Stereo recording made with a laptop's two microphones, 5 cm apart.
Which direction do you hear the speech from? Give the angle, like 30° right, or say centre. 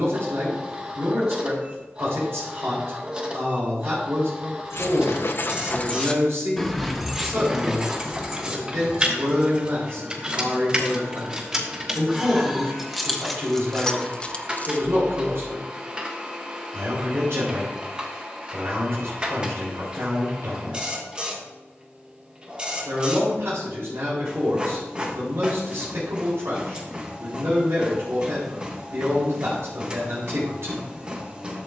70° right.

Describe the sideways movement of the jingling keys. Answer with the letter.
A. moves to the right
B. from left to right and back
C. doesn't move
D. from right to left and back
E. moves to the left
B.